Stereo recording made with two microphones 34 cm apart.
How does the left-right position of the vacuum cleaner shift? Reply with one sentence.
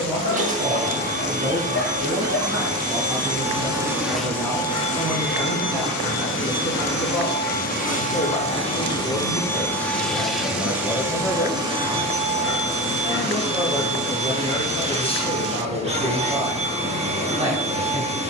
You can hear the vacuum cleaner move from right to left and back again.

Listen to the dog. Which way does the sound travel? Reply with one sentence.
You can hear the dog stay in one place.